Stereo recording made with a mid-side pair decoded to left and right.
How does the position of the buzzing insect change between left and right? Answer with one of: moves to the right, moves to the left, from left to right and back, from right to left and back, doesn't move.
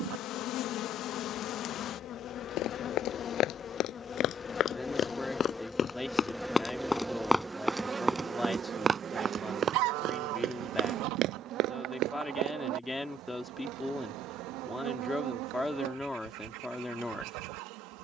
moves to the right.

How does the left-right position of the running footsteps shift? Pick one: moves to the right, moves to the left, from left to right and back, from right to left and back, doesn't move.
moves to the right.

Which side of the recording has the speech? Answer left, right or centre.
centre.